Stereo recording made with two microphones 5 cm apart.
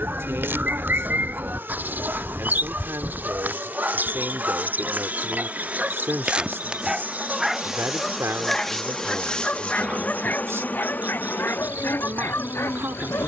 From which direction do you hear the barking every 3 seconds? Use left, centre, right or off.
right, right, centre, left, left.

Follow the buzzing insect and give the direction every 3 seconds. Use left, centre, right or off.
right, right, centre, left, left.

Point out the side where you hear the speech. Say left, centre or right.
right.